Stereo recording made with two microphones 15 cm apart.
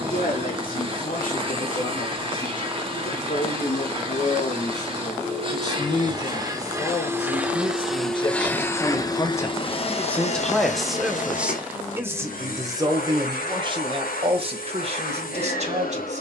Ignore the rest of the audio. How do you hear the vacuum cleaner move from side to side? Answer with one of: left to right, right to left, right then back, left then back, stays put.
right to left.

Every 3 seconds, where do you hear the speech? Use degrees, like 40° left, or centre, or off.
70° left, 60° left, 40° left, centre, 30° right, 50° right.